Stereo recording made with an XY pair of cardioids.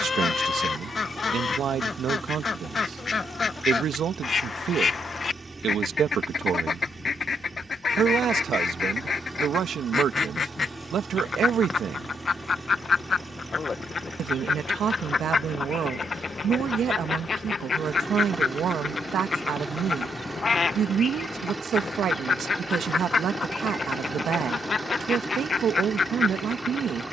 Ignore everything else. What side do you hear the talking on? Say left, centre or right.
right.